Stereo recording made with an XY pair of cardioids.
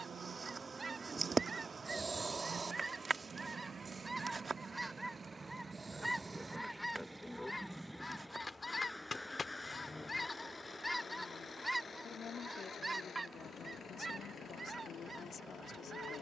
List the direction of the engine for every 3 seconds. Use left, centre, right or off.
right, right, centre, left, left, left.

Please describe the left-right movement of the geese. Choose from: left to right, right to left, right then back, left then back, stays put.
left then back.